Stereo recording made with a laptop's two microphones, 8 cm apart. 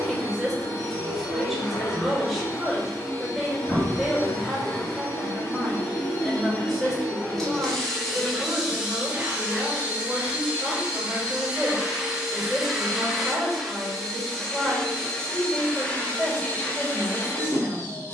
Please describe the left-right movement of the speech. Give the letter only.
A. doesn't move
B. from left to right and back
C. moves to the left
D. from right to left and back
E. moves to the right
A.